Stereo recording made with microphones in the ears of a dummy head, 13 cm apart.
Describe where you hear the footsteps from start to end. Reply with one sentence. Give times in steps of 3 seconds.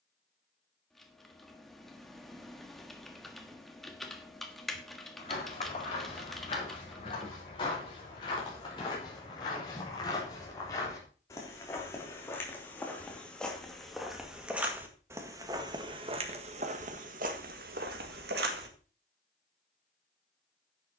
You can hear the footsteps not at all from 0 s, on the left from 3 s, in the centre from 12 s and on the right from 15 s.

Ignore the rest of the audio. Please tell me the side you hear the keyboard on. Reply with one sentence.
In this clip you hear the keyboard in the centre.